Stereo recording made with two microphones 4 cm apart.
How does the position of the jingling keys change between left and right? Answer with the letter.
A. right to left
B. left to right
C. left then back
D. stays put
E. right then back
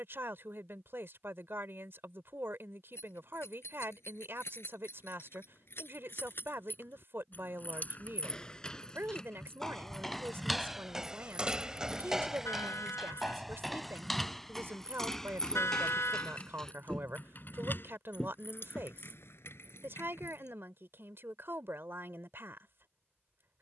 E.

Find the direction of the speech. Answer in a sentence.
You can hear the speech on the right.